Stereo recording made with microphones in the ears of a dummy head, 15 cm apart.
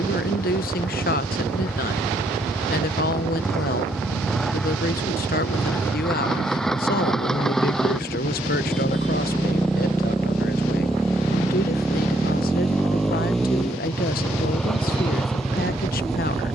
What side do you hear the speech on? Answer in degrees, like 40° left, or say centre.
60° left.